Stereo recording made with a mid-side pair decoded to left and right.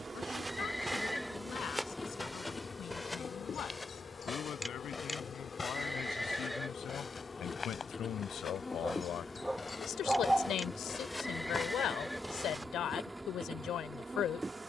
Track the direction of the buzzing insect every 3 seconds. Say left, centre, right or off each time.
centre, left, left, centre, centre.